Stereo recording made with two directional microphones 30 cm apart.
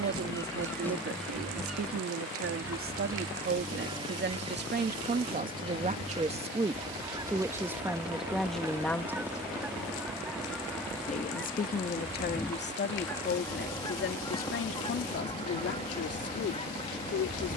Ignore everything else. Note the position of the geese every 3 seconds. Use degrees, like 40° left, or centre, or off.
centre, 20° right, 10° right, centre, 10° left, 20° left.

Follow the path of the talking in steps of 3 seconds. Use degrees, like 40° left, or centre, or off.
50° right, 40° right, 10° right, 20° left, 40° left, 50° left.